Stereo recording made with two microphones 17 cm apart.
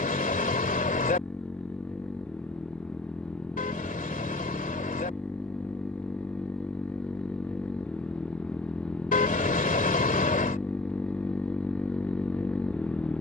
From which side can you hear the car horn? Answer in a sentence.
In this clip you hear the car horn on the left.